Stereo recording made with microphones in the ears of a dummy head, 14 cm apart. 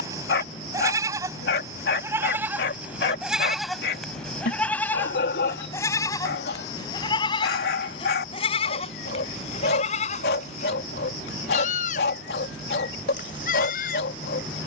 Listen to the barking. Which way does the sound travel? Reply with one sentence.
You can hear the barking stay put.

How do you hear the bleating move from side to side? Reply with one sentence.
In this clip you hear the bleating move from right to left.